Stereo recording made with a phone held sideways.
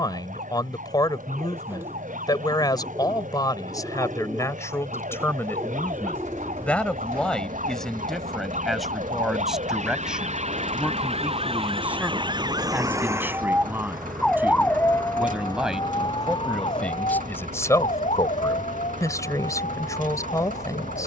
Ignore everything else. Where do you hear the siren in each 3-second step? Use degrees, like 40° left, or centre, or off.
80° right, 80° right, 70° right, 50° right, 10° right, 40° left, 60° left.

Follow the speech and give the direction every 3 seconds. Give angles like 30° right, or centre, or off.
30° left, 20° left, centre, 10° right, 10° right, 10° left, 20° left.